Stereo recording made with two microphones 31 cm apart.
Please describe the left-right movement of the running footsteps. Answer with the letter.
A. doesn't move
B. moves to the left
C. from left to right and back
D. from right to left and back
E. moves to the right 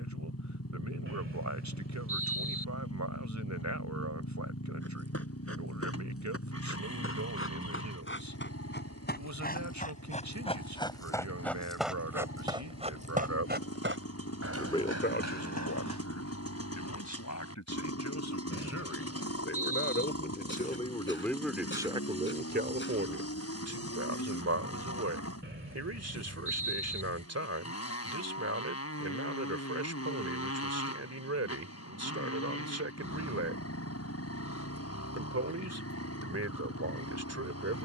E.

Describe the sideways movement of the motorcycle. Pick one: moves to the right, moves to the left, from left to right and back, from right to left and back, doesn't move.
doesn't move.